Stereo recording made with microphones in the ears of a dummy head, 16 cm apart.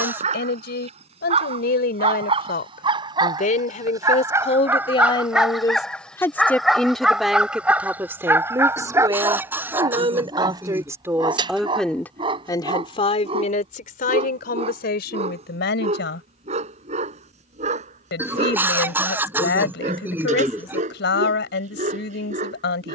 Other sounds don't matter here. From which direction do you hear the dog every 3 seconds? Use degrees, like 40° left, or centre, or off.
30° right, 10° right, 10° right, 20° right, 30° right, 40° right, 40° right, 40° right.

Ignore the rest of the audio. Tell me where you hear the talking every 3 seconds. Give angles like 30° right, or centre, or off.
60° left, 30° left, centre, 20° right, 40° left, 70° left, 70° left, 70° left.